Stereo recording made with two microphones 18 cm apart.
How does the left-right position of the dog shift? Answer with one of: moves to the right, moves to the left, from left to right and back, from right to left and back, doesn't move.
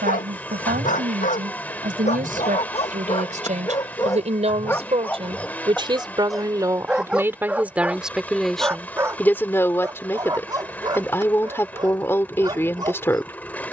moves to the right.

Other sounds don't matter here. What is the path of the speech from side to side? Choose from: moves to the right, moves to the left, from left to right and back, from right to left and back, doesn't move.
moves to the left.